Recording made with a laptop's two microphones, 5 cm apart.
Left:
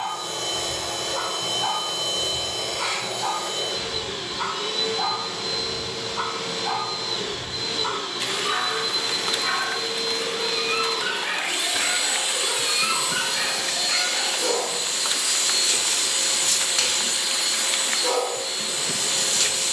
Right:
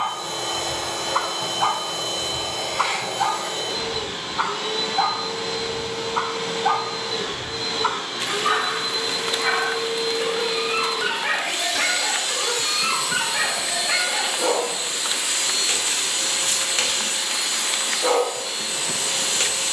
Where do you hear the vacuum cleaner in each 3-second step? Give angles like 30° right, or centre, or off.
60° right, 60° right, 60° right, 20° right, 10° right, 50° right, 60° right.